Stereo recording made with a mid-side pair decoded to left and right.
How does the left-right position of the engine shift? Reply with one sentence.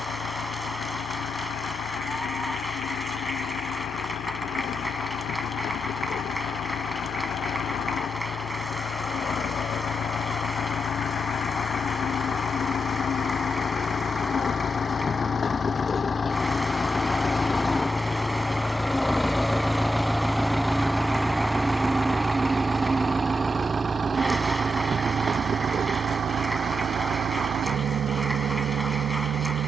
You can hear the engine go from the left side to the right.